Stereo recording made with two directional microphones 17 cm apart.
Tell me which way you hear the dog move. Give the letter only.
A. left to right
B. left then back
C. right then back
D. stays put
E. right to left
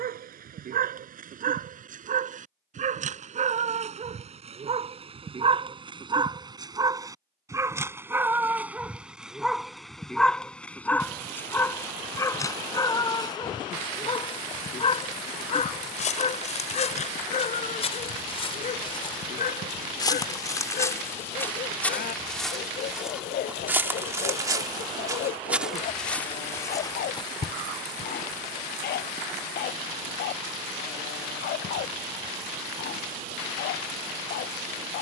E.